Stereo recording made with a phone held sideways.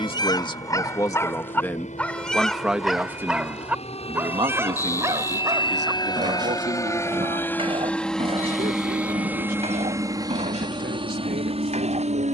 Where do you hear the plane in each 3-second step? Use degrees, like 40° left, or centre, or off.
50° left, 40° left, 10° left, 20° right.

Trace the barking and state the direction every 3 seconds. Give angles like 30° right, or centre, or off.
10° left, 10° right, 30° right, 40° right.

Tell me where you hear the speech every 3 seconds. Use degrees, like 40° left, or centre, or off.
10° left, 30° right, 50° right, 70° right.